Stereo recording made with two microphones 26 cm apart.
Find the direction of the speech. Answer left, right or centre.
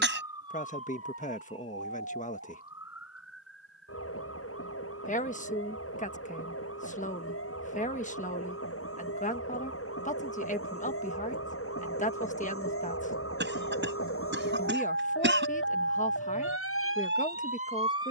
left.